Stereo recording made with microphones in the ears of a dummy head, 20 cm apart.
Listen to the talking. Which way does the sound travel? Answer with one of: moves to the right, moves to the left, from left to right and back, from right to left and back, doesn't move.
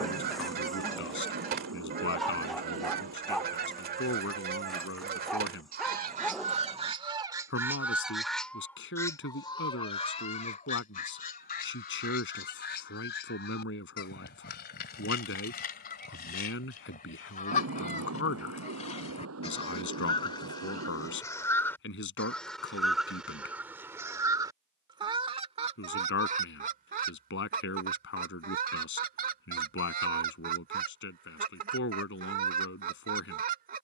doesn't move.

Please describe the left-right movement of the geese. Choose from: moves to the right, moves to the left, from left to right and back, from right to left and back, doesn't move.
from right to left and back.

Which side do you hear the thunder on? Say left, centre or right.
right.